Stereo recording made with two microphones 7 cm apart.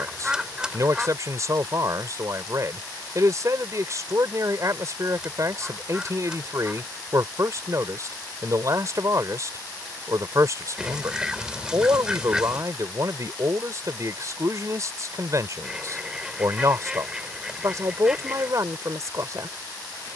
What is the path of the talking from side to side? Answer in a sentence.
You can hear the talking stay in one place.